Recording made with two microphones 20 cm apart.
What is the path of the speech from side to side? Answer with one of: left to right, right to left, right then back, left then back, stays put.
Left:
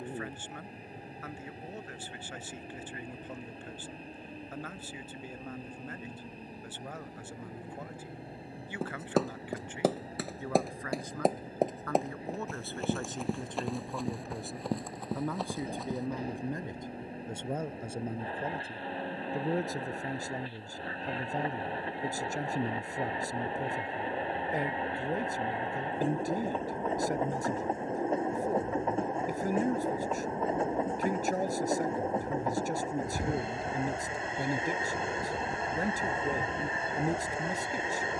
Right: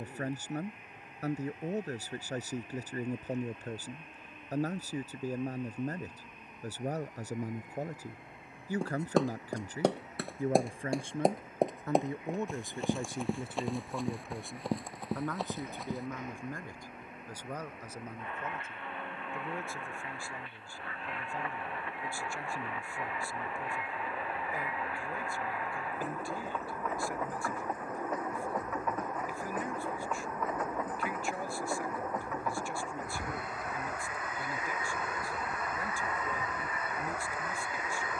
right to left.